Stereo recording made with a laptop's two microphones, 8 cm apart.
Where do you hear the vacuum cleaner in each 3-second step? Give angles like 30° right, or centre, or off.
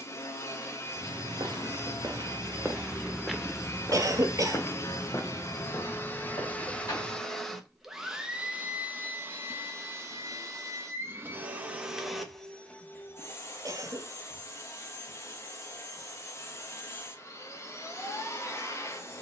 40° left, 40° left, centre, 30° right, 30° left, 40° left, 40° left.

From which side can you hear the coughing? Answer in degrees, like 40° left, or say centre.
50° right.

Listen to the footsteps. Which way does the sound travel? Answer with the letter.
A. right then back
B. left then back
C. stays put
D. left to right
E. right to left
E.